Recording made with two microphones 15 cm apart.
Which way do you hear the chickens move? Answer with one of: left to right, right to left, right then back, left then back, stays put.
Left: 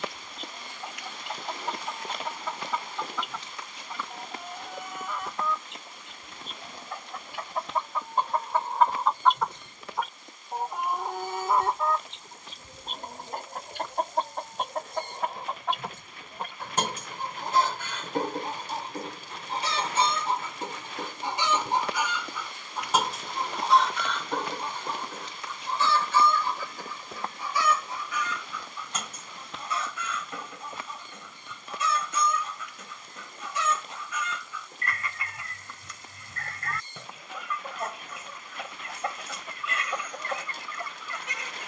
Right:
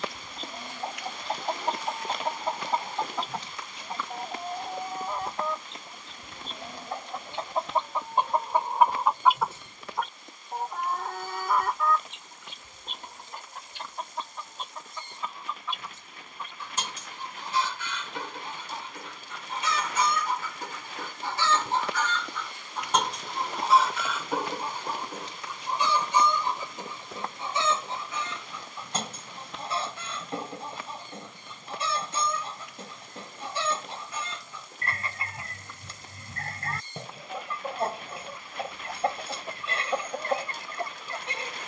left then back.